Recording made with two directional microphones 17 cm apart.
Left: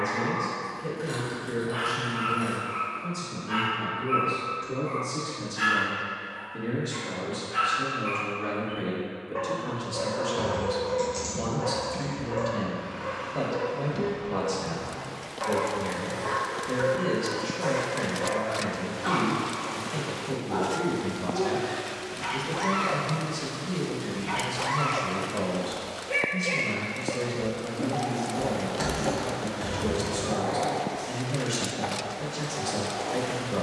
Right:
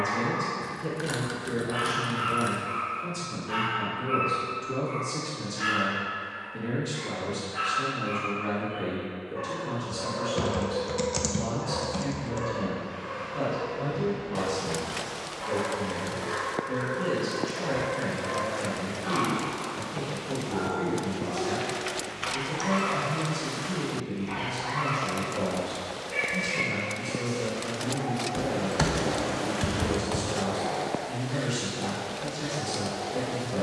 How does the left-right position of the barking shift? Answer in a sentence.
In this clip you hear the barking go from the right side to the left.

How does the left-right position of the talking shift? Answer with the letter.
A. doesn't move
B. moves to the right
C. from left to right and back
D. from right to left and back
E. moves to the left
E.